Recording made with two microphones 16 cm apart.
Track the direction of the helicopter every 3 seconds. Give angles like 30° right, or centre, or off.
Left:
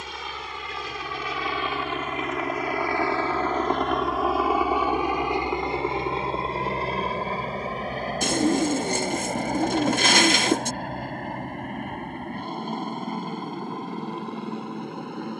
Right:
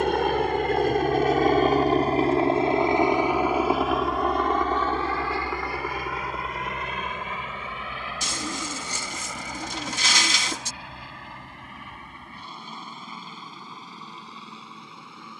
50° right, centre, 30° left, 50° left, 50° left.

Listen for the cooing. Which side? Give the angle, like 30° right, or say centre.
60° left.